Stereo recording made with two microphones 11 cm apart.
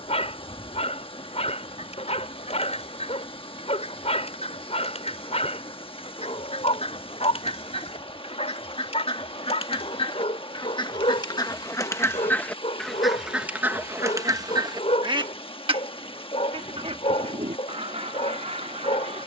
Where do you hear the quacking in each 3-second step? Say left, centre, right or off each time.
left, left, left, left, centre, right, right.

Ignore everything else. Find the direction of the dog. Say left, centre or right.
left.